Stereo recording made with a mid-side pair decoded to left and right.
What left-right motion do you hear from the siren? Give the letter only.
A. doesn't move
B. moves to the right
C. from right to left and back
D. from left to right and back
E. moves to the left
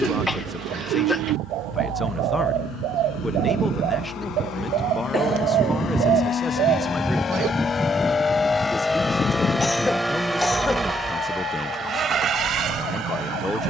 E.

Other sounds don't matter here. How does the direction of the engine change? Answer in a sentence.
In this clip you hear the engine move to the right.